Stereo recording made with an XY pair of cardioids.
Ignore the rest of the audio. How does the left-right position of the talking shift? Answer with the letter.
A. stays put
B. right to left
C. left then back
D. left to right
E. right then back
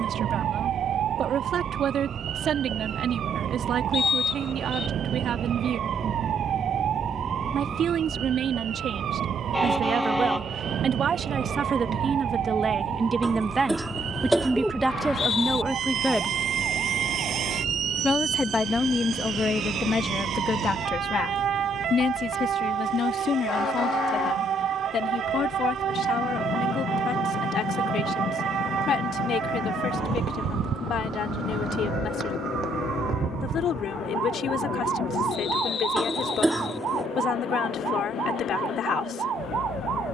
B.